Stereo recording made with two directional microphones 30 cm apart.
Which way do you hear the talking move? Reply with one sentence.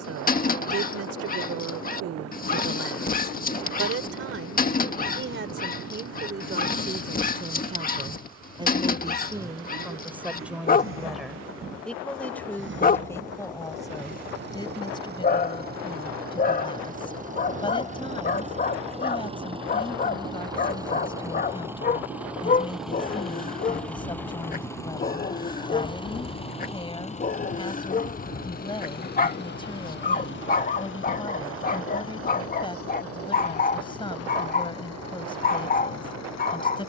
You can hear the talking travel towards the left.